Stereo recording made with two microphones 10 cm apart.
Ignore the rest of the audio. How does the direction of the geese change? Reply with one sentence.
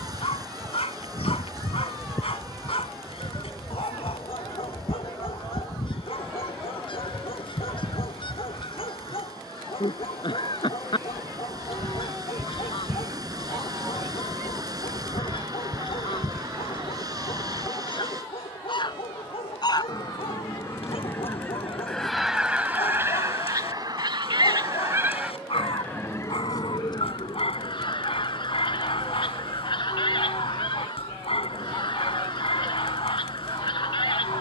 You can hear the geese go right and come back.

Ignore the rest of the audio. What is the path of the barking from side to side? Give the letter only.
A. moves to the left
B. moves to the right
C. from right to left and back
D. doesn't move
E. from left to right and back
D.